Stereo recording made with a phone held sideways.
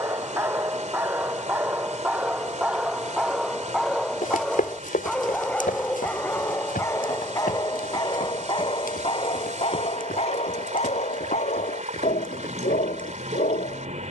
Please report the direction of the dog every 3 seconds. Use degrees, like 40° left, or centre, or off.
10° right, centre, 20° left, 50° left, 60° left.